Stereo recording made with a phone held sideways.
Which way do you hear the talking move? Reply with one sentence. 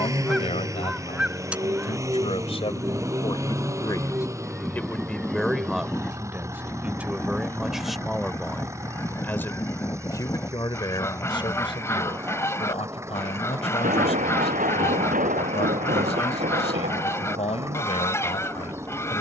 In this clip you hear the talking go right and come back.